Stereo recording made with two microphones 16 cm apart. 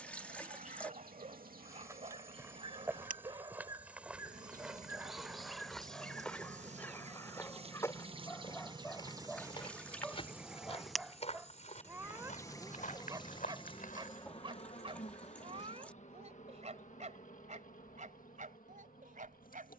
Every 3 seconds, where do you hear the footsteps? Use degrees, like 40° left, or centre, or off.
20° right, centre, 20° left, 40° left, 60° left, off, off.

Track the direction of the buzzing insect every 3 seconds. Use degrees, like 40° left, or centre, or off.
70° right, 60° right, 40° right, 10° right, 30° left, 50° left, 60° left.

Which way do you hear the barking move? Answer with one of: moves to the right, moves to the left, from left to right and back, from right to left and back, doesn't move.
from right to left and back.